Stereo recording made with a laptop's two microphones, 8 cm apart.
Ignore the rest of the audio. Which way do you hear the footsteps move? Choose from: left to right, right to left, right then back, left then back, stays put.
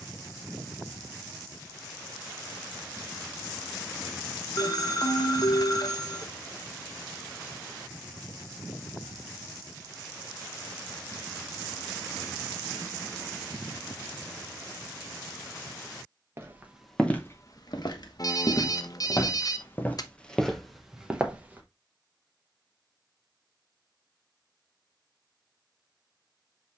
left then back.